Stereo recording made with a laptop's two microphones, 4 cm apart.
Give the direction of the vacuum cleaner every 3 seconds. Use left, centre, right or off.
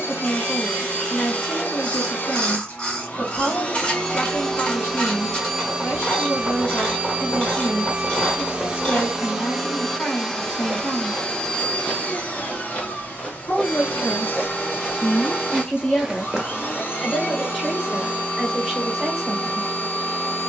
left, centre, right, centre, left, left, left.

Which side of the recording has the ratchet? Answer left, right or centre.
left.